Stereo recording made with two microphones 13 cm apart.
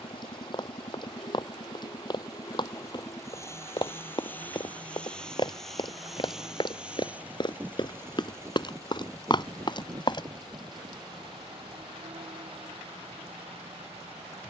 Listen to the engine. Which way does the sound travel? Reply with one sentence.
In this clip you hear the engine travel towards the right.